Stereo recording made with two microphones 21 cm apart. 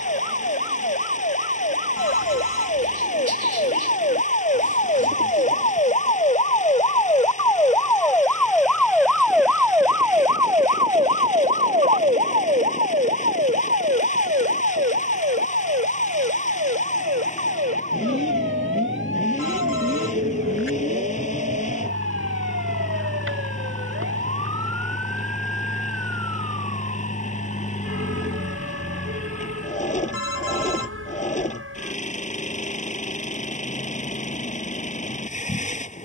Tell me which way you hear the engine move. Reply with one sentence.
In this clip you hear the engine stay put.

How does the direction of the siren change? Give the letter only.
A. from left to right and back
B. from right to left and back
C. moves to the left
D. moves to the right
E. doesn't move
D.